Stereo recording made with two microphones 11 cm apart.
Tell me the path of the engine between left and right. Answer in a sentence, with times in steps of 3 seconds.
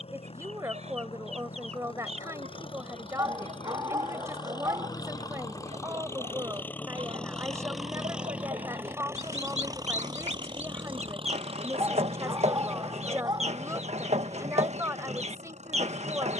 In this clip you hear the engine on the left from 0 s, in the centre from 6 s and on the right from 9 s.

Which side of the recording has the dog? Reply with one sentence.
In this clip you hear the dog on the right.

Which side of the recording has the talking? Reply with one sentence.
In this clip you hear the talking on the right.